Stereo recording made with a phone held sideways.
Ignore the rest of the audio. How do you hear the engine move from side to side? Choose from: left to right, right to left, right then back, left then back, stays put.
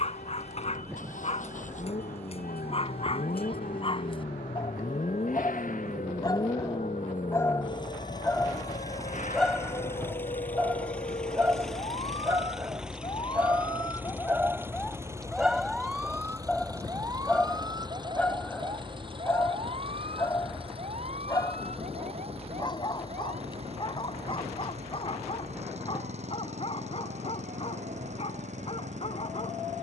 left to right.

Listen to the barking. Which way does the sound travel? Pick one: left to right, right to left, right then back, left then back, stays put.
right then back.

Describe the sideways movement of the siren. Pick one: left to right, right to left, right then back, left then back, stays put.
left to right.